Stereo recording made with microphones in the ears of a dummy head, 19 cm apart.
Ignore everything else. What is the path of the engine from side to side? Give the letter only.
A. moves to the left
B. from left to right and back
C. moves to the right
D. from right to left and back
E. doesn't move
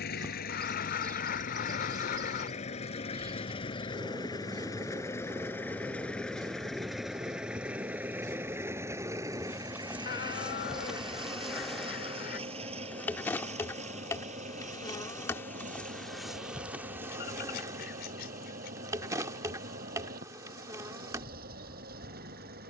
C.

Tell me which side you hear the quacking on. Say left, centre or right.
left.